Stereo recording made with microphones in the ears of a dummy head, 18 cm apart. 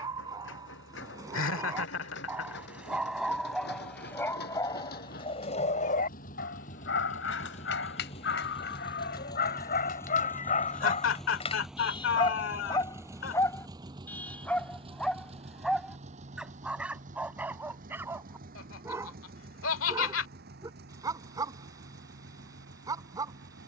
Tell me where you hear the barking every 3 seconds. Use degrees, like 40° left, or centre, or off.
20° right, 20° left, 60° left, 40° left, 10° left, centre, 20° right, 20° right.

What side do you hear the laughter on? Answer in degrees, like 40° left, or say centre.
80° left.